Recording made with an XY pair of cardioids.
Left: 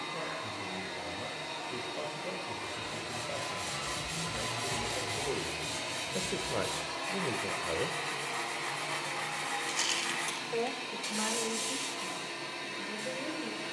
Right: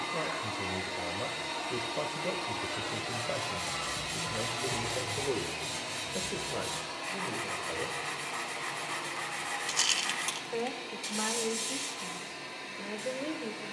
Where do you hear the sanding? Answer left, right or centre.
centre.